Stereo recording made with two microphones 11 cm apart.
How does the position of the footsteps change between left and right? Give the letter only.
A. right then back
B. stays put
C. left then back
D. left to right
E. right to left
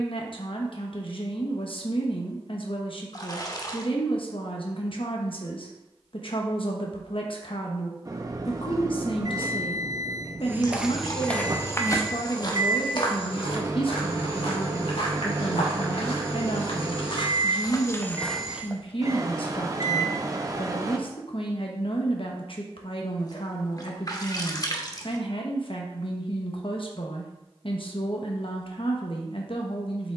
C.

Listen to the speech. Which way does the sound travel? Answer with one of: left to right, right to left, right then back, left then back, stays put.
stays put.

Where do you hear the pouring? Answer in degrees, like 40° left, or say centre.
40° left.